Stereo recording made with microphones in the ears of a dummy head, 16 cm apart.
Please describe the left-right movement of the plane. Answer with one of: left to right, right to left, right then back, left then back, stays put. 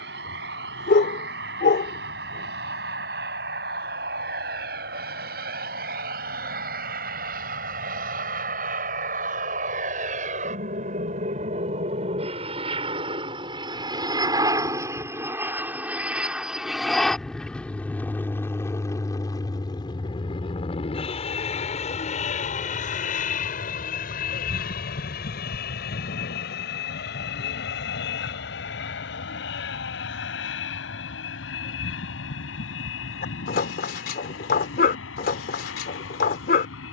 right to left.